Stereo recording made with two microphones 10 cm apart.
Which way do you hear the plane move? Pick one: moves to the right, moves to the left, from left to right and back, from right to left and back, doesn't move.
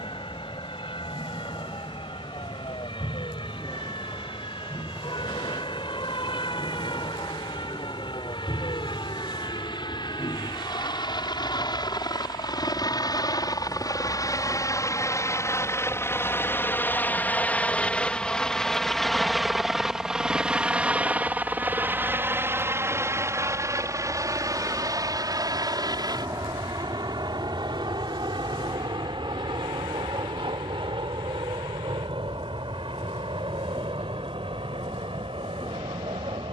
moves to the right.